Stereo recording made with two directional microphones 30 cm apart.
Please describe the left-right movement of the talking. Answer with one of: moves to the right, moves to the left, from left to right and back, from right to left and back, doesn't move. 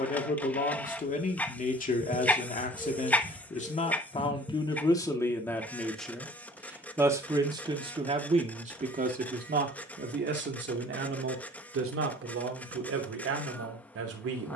moves to the right.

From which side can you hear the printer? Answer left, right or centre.
centre.